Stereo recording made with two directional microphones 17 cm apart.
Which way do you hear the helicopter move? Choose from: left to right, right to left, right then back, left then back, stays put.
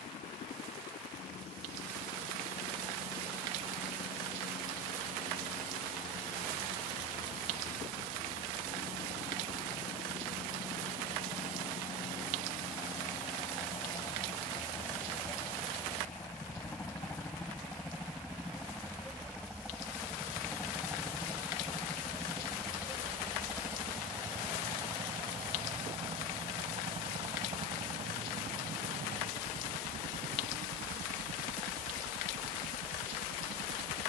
left to right.